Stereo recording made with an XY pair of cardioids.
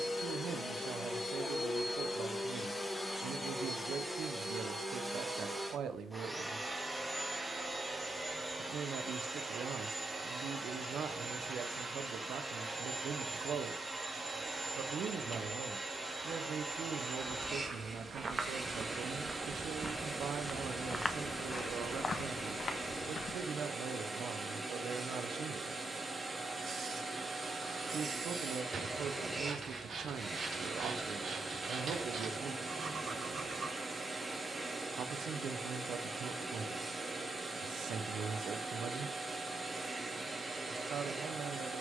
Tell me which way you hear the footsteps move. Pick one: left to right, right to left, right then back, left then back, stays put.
right to left.